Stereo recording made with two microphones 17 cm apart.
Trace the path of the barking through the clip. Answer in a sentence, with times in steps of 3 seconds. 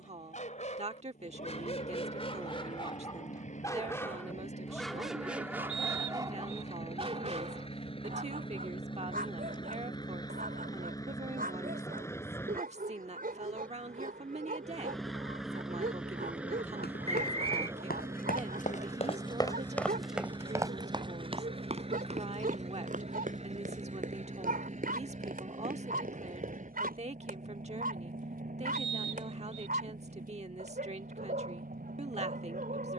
You can hear the barking on the left from 0 s, in the centre from 3 s and on the right from 6 s.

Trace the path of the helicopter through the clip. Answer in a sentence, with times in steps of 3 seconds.
You can hear the helicopter on the left from 0 s, in the centre from 12 s and on the right from 18 s.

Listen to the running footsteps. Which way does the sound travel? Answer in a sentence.
In this clip you hear the running footsteps travel towards the right.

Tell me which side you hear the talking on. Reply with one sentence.
In this clip you hear the talking on the right.